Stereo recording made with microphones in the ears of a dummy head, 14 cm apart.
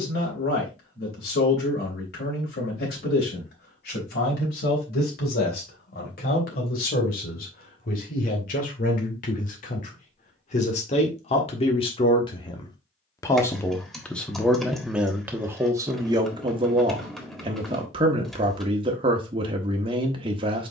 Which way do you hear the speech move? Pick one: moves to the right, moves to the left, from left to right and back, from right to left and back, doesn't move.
moves to the right.